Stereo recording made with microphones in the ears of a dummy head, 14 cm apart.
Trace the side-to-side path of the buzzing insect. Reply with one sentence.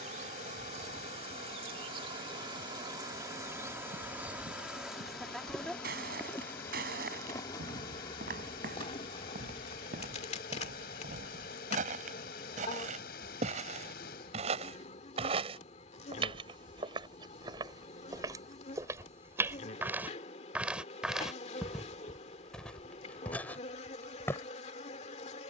In this clip you hear the buzzing insect travel towards the left.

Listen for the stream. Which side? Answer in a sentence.
In this clip you hear the stream on the left.